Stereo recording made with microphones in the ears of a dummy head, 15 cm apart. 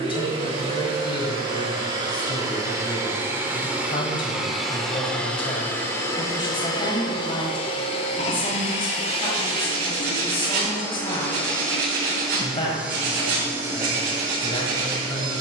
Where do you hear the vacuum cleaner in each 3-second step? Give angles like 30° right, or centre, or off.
30° right, centre, 30° left, 20° left, 20° right.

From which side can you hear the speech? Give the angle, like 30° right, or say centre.
30° left.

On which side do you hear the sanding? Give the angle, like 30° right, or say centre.
70° right.